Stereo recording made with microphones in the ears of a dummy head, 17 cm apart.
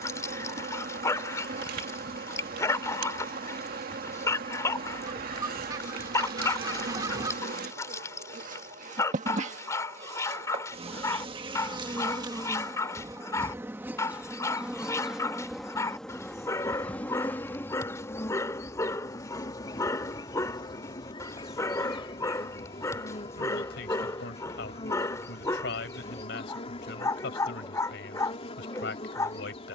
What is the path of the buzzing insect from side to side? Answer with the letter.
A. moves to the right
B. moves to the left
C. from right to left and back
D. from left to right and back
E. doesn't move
B.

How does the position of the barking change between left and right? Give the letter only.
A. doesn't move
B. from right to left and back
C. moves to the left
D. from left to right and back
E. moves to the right
A.